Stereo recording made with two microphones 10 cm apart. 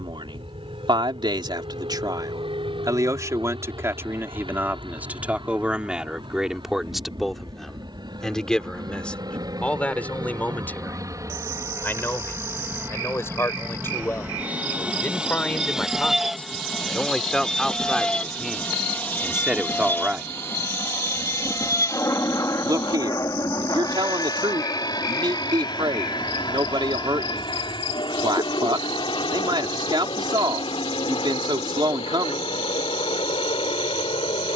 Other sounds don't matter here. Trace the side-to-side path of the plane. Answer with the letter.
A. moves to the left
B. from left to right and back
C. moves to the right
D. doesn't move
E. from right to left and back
A.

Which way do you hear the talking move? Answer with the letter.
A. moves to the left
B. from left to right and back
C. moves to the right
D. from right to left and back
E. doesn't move
D.